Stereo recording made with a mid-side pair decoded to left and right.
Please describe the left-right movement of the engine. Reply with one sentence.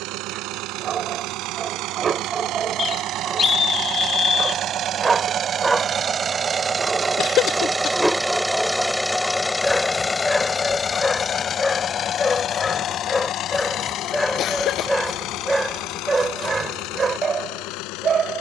You can hear the engine move to the left.